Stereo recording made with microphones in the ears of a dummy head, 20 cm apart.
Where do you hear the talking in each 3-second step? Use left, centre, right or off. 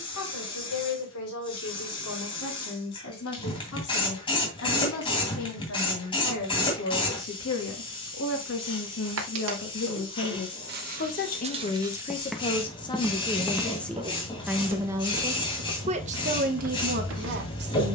left, left, left, left, centre, right.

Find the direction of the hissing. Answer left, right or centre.
left.